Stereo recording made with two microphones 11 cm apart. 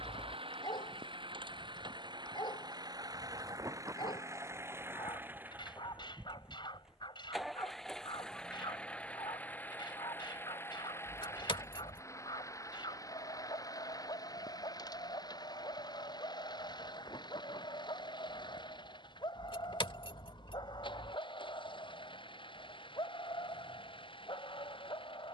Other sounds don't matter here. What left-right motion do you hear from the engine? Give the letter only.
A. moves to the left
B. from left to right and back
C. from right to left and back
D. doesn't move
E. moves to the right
A.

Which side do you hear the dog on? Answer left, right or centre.
left.